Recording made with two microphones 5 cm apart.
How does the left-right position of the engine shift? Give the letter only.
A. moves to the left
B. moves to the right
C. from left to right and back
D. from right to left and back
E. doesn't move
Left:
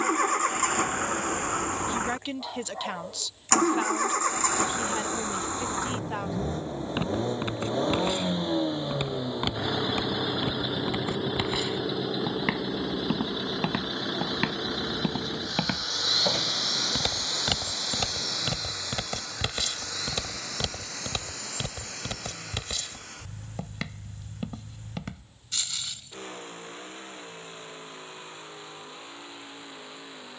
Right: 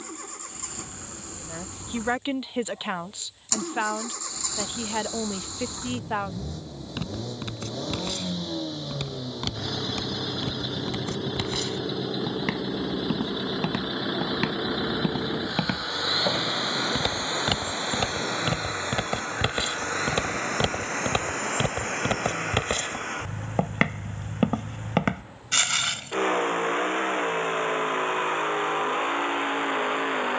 B.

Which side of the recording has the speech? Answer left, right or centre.
right.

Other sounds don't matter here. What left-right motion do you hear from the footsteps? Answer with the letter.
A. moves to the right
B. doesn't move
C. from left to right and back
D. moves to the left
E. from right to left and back
A.